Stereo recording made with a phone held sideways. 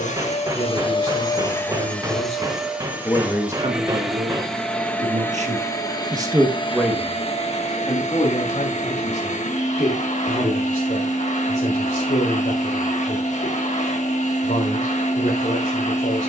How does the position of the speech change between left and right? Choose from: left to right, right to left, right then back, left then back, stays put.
right then back.